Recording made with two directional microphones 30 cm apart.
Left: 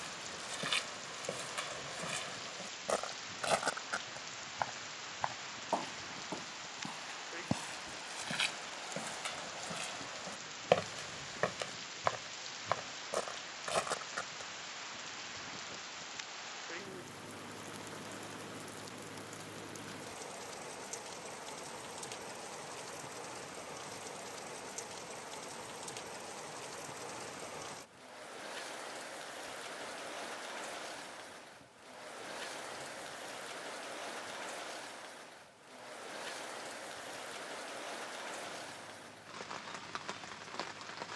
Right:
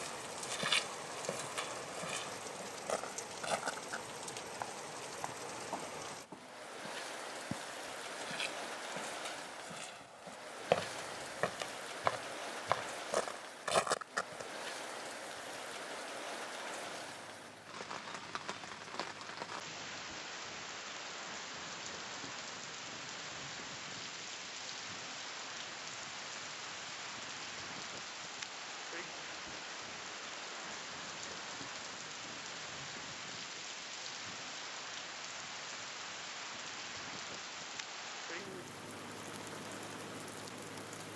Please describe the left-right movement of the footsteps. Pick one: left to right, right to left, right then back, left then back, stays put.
left then back.